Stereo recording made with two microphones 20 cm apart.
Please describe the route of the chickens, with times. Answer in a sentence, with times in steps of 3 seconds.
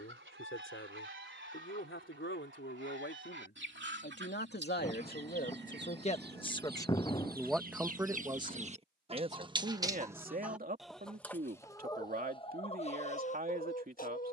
You can hear the chickens on the right from 0 s, in the centre from 9 s and on the left from 12 s.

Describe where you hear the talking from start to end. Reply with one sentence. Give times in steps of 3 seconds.
In this clip you hear the talking on the left from 0 s, in the centre from 6 s and on the right from 9 s.